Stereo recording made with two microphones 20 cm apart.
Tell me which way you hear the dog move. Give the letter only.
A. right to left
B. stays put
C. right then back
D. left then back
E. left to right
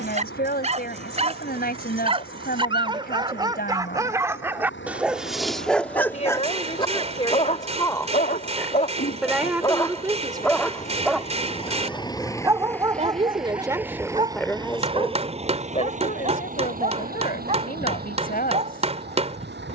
D.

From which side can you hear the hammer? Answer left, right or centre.
right.